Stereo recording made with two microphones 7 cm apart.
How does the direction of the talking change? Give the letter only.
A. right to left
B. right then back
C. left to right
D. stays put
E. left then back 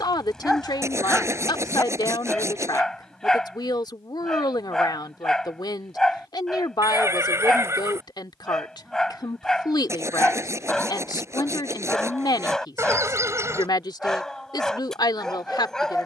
D.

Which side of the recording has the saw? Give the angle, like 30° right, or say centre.
40° right.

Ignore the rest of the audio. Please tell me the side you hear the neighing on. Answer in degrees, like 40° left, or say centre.
40° right.